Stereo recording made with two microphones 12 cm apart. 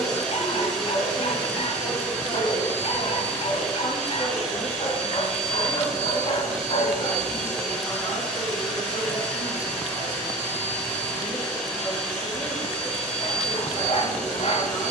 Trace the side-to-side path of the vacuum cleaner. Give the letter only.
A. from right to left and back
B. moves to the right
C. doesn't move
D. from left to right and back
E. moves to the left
C.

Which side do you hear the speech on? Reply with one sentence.
You can hear the speech on the left.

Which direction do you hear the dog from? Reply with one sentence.
In this clip you hear the dog on the left.